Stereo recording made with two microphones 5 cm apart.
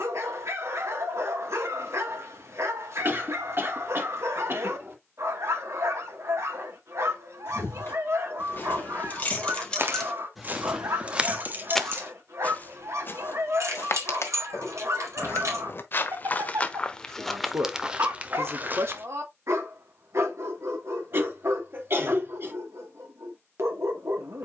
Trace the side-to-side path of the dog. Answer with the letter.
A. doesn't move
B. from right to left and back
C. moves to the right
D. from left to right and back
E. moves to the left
A.